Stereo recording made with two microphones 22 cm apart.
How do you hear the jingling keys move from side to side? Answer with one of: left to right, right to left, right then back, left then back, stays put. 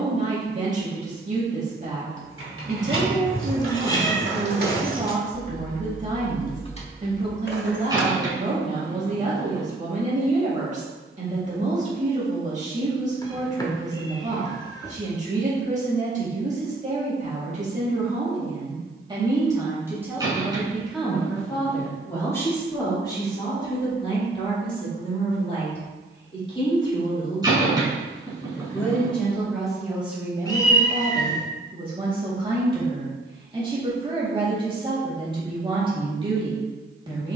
right to left.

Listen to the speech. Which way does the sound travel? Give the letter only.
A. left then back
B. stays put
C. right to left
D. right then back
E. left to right
A.